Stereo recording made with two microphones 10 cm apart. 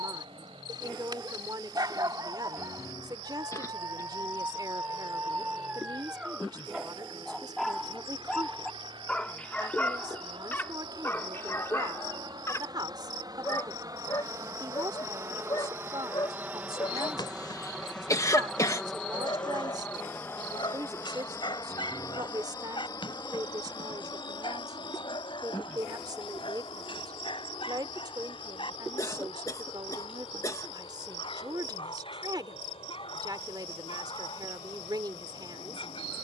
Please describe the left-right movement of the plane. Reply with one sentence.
You can hear the plane go from the right side to the left.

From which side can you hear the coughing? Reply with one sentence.
You can hear the coughing on the left.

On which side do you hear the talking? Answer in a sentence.
In this clip you hear the talking on the right.